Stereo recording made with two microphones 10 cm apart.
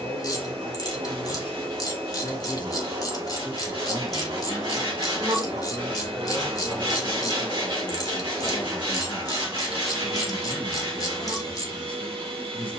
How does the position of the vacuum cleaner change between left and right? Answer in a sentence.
You can hear the vacuum cleaner stay in one place.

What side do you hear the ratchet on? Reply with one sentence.
In this clip you hear the ratchet on the left.